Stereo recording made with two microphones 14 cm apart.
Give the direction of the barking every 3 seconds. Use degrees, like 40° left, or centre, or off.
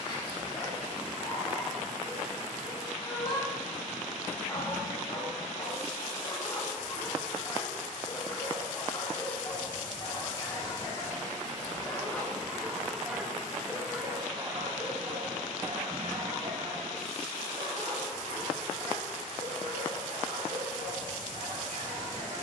30° left, 30° left, 30° left, 30° left, 10° right, 50° right, 70° right, 70° right.